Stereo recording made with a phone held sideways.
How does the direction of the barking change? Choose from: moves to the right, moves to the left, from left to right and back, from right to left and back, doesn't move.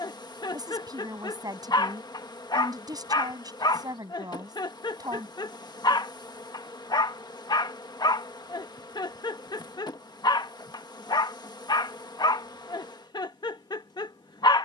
doesn't move.